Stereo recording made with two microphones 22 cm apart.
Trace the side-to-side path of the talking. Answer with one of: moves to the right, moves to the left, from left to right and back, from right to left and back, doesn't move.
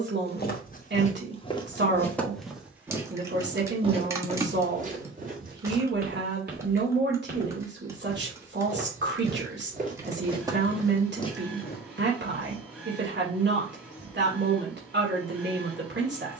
doesn't move.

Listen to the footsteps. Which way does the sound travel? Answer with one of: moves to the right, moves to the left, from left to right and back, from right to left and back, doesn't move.
from left to right and back.